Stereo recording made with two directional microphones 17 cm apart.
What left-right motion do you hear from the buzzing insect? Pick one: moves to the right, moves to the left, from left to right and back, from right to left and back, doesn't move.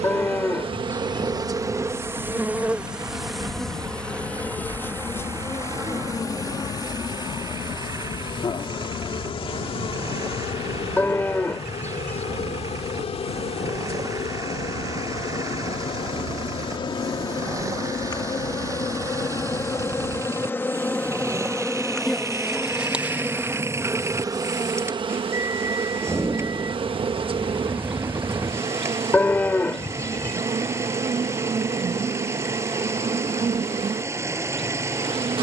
from right to left and back.